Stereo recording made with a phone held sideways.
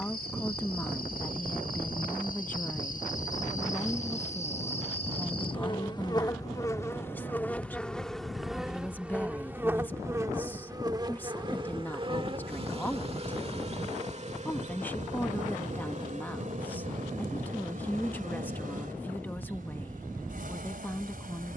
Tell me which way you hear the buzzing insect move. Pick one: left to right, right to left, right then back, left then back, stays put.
left to right.